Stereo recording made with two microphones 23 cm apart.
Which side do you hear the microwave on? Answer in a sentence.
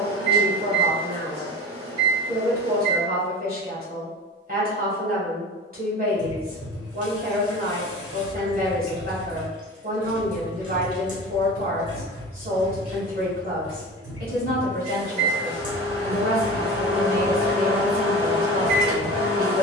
You can hear the microwave on the right.